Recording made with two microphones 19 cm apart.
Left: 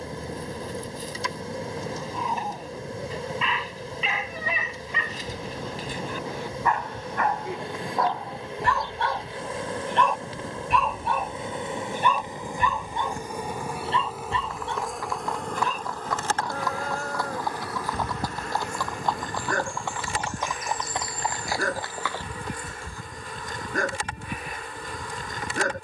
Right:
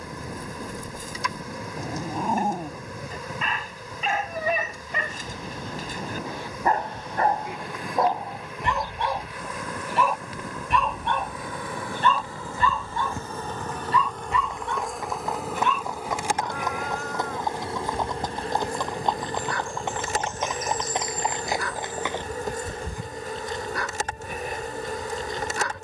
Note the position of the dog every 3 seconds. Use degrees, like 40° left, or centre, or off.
50° right, 50° right, 30° right, centre, 20° left, 40° left, 50° left, 50° left, 50° left.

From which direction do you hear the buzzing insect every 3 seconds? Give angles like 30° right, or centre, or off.
30° left, 30° left, 30° left, 30° left, 10° left, 10° right, 40° right, 40° right, 40° right.